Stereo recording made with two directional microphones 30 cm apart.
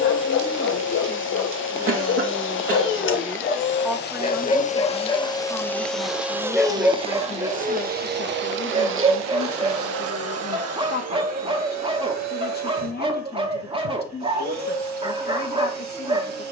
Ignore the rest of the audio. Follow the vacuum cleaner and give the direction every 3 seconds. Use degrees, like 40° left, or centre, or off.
40° left, 30° left, 20° right, 50° right, 60° right, 60° right.